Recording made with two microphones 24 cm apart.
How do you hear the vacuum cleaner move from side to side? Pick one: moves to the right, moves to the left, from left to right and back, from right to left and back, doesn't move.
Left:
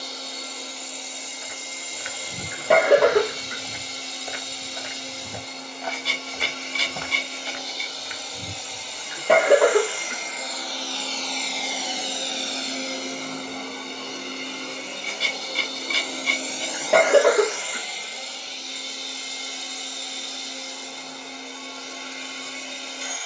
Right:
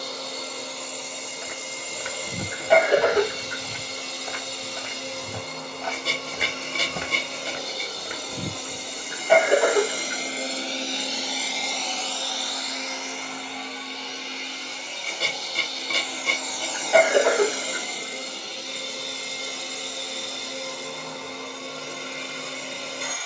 from right to left and back.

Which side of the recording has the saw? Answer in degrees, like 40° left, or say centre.
50° right.